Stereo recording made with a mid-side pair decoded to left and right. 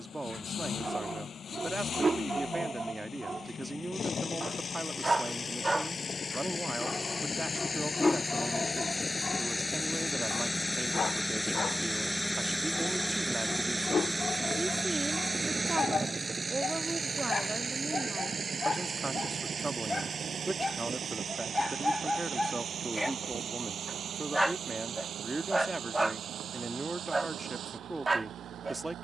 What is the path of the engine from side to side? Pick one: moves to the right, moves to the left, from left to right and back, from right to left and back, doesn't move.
moves to the right.